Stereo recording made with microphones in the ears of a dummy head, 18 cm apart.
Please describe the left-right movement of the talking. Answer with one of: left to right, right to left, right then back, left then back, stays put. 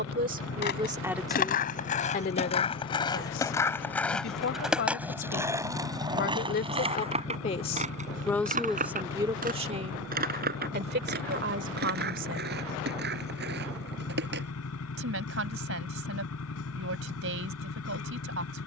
left then back.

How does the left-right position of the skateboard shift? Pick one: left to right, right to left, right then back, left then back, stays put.
left to right.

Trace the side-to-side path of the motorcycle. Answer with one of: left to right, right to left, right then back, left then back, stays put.
stays put.